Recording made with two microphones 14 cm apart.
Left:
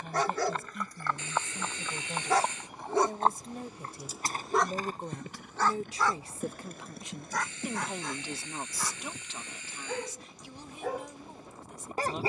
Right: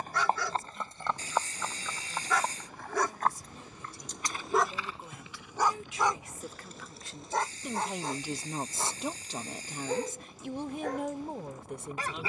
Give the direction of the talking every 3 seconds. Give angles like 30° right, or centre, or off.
60° left, 50° left, 10° left, 50° right.